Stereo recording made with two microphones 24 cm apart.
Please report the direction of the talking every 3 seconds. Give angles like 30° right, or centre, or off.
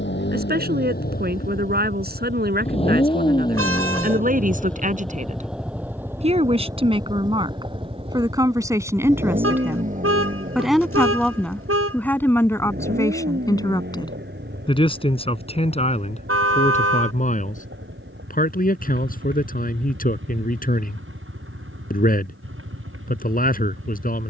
40° right, 40° right, 20° right, centre, 10° left, 30° left, 40° left, 40° left.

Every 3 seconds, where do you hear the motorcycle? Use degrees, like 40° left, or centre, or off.
40° left, 10° left, 20° right, 30° right, 40° right, 50° right, 50° right, 60° right.